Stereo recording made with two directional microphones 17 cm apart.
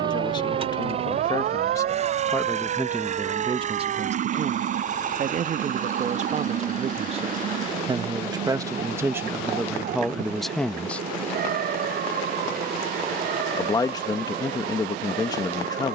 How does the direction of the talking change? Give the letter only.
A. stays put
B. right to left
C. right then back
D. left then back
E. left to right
C.